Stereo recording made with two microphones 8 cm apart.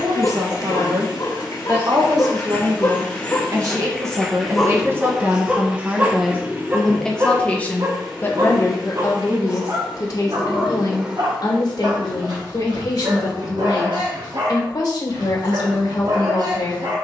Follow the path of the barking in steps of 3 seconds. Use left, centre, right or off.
left, centre, right, right, right, right.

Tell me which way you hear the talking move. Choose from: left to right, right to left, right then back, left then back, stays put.
right to left.